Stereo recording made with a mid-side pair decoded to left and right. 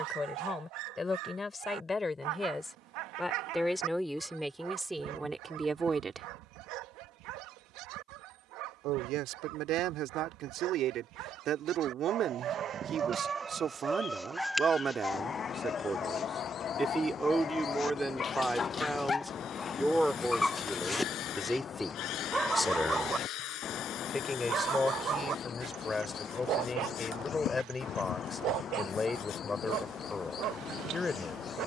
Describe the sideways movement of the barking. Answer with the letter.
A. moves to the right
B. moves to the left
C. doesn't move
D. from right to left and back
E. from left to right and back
D.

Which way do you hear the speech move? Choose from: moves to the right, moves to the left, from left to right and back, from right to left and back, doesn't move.
from left to right and back.